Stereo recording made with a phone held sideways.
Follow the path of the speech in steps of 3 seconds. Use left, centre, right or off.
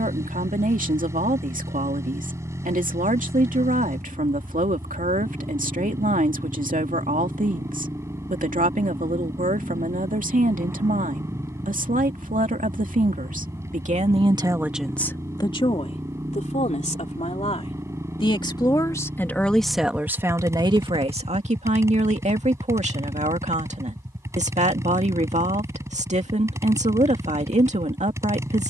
right, right, right, right, right, left, centre, right, right, right.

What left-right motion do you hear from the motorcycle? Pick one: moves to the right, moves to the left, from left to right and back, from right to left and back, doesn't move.
doesn't move.